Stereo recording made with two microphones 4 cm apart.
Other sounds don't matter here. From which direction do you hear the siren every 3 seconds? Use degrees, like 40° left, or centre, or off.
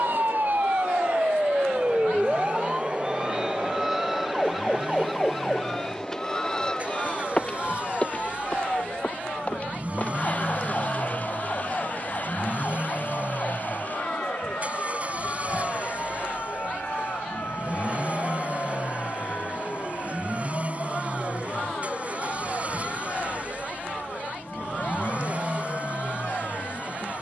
30° right, centre, 20° left, 30° left, 40° left, 40° left, 50° left, 50° left, 50° left.